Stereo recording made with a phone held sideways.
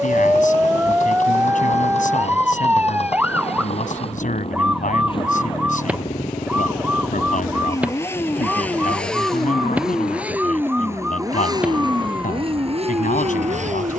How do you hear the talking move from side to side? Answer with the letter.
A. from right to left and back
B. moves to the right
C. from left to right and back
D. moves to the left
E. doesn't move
E.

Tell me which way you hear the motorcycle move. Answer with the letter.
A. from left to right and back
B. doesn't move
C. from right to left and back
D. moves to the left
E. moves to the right
E.